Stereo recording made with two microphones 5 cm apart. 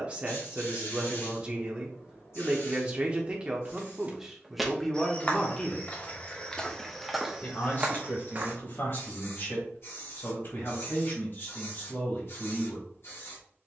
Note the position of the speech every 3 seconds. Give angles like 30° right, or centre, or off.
30° right, centre, 40° left, 50° left, 50° left.